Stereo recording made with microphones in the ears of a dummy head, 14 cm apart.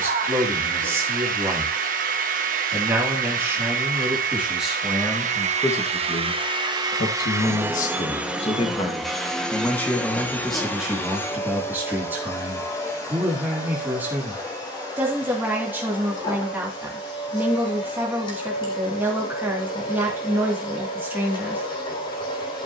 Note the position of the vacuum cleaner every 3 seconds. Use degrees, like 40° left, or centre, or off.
60° right, 50° right, 20° right, 10° left, 20° left, 30° left, 30° left, 30° left.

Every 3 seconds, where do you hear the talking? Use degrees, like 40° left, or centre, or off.
10° right, centre, 40° left, centre, 10° right, 10° right, 10° right, 10° right.